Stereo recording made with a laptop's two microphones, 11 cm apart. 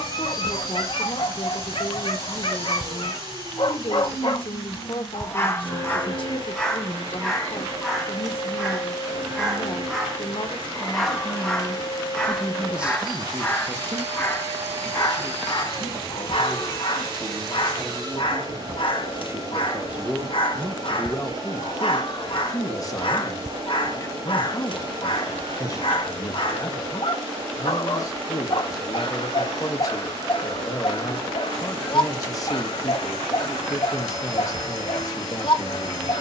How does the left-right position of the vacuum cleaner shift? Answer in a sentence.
In this clip you hear the vacuum cleaner stay in one place.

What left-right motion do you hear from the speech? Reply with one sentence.
In this clip you hear the speech move from left to right and back again.